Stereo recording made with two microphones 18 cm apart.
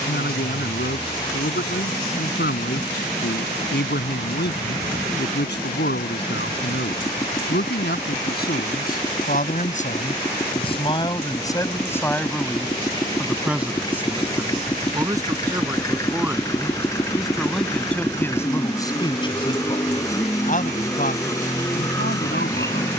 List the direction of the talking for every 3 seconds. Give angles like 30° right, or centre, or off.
70° left, 70° left, 70° left, 30° left, centre, 10° right, 30° left, 60° left.